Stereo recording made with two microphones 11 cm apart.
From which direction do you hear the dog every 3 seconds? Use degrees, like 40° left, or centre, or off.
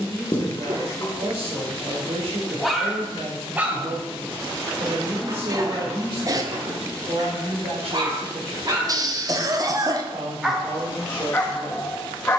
20° left, 30° right, 40° right, 10° left.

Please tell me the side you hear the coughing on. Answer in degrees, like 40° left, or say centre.
40° right.